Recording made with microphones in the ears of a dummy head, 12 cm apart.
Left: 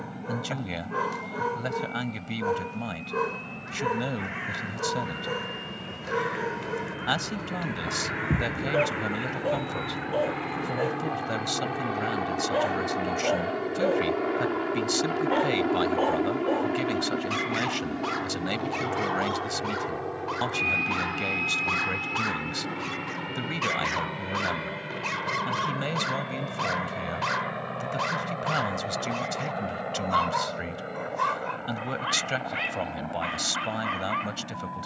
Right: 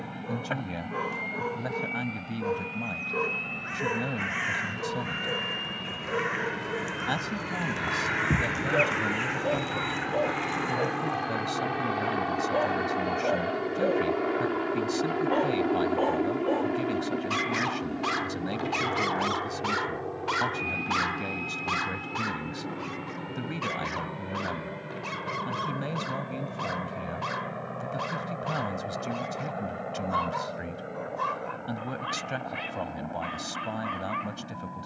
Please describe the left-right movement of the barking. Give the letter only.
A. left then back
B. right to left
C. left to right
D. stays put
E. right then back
E.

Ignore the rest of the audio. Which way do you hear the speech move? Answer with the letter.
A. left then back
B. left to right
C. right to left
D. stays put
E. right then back
D.